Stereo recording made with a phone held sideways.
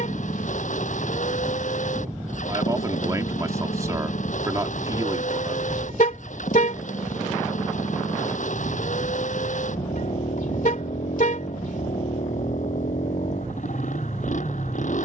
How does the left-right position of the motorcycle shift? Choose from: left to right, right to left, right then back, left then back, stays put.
stays put.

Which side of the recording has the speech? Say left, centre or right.
right.